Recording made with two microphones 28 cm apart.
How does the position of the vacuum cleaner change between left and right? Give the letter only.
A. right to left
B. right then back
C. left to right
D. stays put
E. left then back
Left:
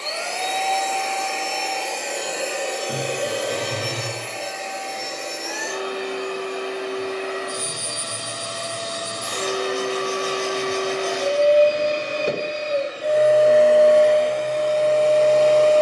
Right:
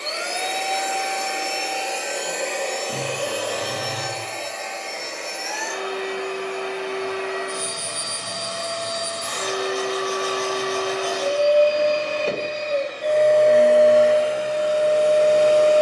E.